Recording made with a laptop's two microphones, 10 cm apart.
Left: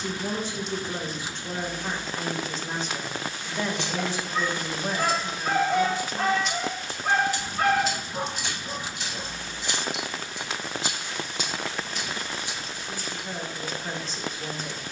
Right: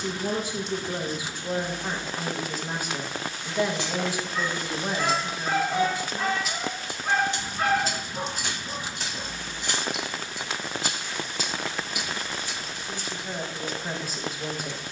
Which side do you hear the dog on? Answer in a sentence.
You can hear the dog on the left.